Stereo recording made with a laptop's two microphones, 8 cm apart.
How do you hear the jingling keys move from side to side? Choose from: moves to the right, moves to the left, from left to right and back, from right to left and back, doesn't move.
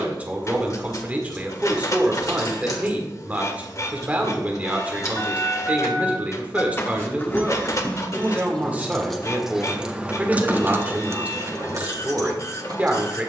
moves to the right.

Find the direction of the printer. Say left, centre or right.
left.